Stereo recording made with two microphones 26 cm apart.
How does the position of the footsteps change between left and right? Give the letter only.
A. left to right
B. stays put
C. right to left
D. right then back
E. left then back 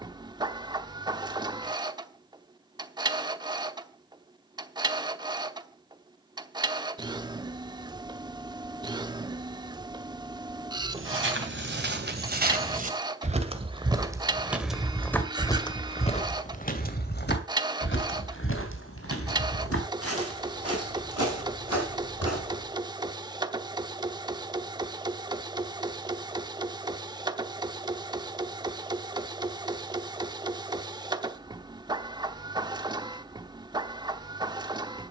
C.